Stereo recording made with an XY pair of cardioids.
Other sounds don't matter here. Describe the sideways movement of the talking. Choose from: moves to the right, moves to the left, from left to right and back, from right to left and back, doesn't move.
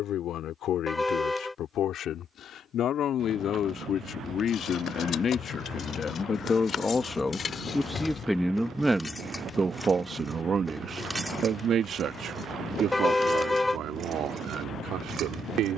moves to the right.